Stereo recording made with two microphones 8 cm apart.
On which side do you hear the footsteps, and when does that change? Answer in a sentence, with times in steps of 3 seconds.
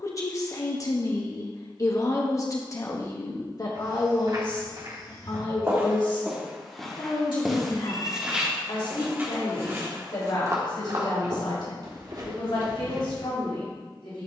You can hear the footsteps not at all from 0 s, on the right from 3 s, in the centre from 6 s and on the right from 9 s.